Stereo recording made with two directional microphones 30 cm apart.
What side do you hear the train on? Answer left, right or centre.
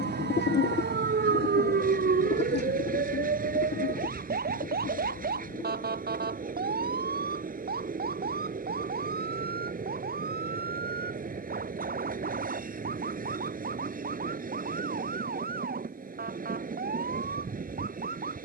right.